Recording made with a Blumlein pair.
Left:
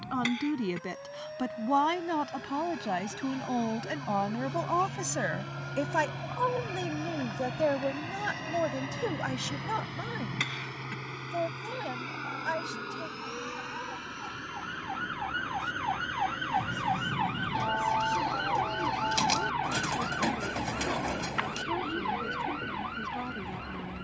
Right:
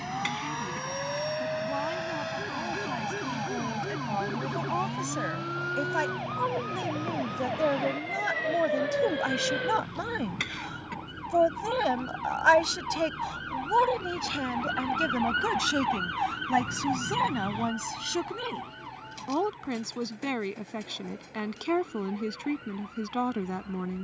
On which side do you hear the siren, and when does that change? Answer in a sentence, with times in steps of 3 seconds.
In this clip you hear the siren on the right from 0 s, in the centre from 15 s and on the left from 18 s.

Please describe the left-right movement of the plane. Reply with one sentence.
You can hear the plane move to the left.